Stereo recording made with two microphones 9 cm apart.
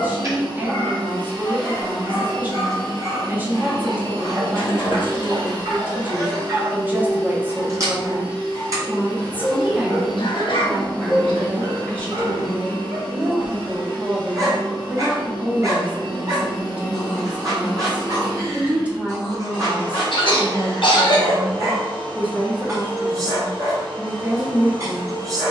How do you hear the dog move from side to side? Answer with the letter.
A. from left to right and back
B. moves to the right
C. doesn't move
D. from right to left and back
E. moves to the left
C.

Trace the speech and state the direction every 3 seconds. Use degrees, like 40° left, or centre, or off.
20° right, 20° right, 20° right, centre, centre, 10° right, 10° right, 10° right, 10° right.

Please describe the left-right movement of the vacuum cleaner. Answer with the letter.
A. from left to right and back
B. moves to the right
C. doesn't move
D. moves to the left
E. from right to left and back
C.